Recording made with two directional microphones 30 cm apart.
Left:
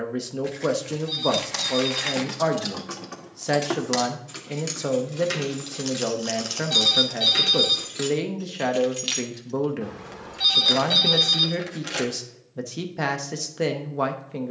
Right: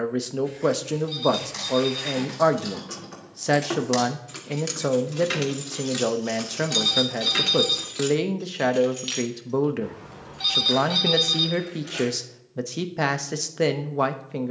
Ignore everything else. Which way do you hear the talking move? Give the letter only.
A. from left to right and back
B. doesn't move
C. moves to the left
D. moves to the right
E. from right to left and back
B.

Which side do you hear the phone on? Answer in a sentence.
You can hear the phone in the centre.